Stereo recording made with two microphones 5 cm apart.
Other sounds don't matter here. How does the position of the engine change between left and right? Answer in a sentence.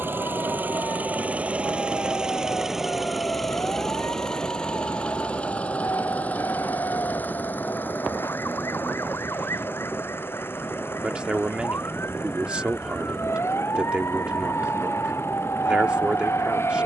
In this clip you hear the engine move to the left.